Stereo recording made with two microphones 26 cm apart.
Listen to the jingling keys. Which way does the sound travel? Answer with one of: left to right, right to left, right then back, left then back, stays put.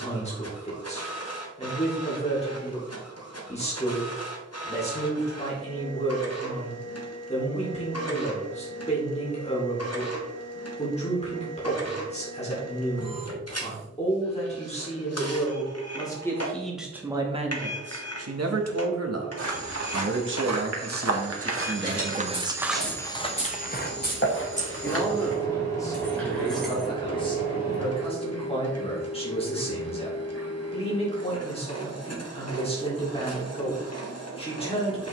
left to right.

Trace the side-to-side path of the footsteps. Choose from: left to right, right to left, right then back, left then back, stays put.
right to left.